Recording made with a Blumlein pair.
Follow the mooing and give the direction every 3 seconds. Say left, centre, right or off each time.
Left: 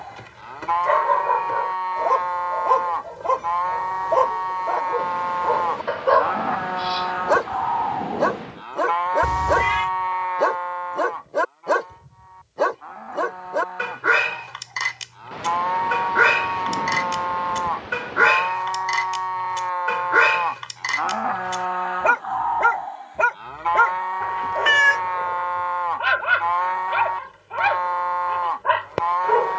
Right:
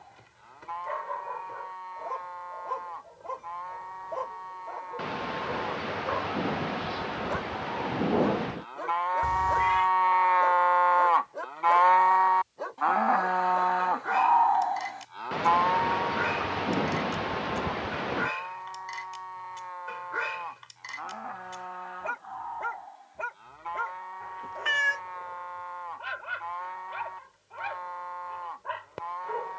left, left, left, centre, right, left, left, left, left, left.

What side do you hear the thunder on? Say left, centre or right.
centre.